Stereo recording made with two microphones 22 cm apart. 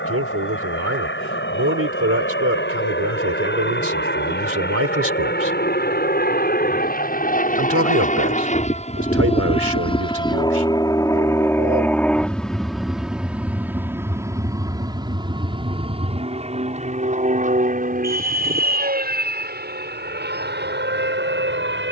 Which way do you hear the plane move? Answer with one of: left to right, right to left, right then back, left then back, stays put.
left to right.